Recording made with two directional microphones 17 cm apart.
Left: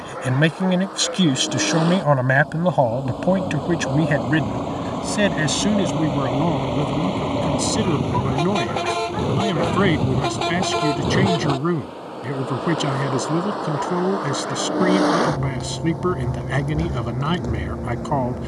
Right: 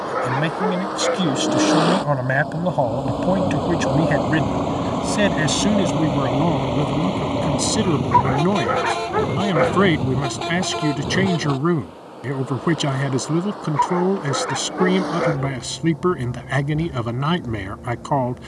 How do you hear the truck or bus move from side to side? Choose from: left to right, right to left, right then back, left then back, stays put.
right to left.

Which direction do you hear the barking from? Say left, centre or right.
right.